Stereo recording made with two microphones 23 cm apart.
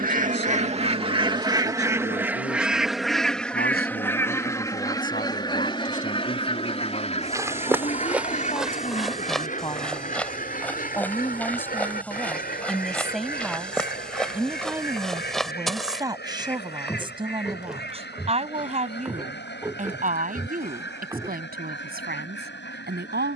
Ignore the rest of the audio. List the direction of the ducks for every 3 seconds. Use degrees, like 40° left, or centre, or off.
20° right, 10° left, 30° left, 40° left, 40° left, 50° left, 50° left, 50° left.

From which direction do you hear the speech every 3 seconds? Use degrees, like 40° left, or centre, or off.
50° left, 40° left, 30° left, 10° left, centre, 20° right, 30° right, 40° right.